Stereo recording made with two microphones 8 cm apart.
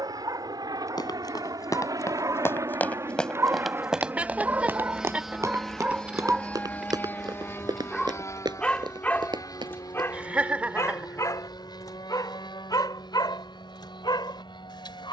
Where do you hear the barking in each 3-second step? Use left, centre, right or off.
right, right, centre, left, left.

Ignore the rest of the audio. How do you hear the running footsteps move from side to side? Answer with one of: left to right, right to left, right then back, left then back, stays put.
left to right.